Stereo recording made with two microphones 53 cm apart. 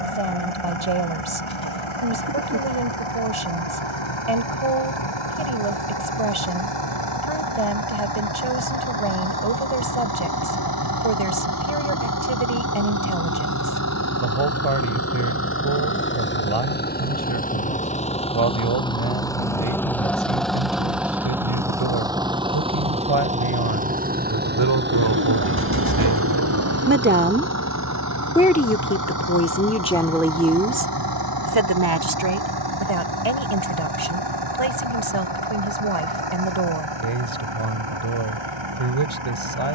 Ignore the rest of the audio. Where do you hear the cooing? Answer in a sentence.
You can hear the cooing on the right.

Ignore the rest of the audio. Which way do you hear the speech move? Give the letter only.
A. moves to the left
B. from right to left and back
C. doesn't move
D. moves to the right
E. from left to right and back
B.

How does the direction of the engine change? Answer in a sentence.
You can hear the engine move to the right.